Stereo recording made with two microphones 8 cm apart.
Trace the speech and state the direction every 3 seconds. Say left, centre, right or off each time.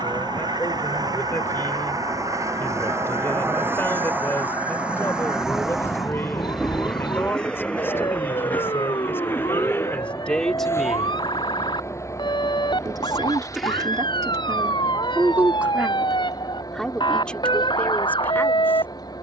left, left, left, centre, right, centre, left.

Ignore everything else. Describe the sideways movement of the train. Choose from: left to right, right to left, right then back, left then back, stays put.
right to left.